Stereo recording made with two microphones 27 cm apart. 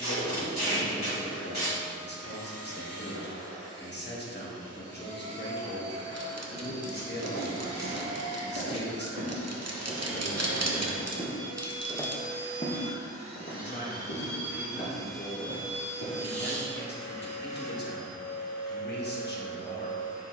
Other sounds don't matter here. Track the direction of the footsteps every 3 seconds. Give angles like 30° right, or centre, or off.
off, off, 70° right, 30° right, 50° left, 70° left, off.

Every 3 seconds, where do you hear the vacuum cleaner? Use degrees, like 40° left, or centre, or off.
60° right, 60° right, 60° right, 50° right, 20° right, 20° left, 30° left.